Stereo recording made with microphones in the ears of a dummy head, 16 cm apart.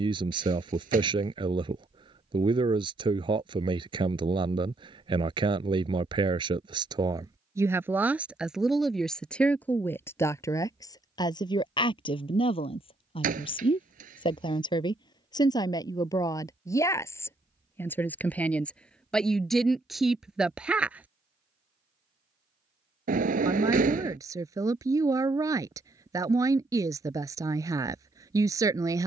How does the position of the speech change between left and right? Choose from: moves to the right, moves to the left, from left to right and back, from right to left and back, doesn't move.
from right to left and back.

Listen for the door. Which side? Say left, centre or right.
right.